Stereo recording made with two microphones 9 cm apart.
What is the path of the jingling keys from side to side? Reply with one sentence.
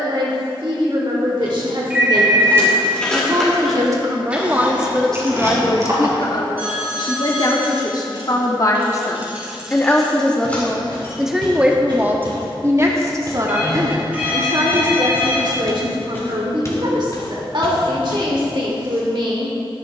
You can hear the jingling keys go right and come back.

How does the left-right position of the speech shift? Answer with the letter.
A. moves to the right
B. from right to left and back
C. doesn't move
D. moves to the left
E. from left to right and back
B.